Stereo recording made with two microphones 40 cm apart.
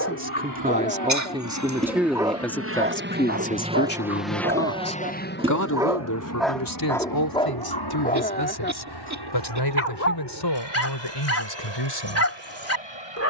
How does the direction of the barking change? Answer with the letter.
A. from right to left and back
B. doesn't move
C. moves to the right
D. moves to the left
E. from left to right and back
E.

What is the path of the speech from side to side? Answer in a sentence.
You can hear the speech move to the left.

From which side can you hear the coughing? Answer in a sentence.
You can hear the coughing on the right.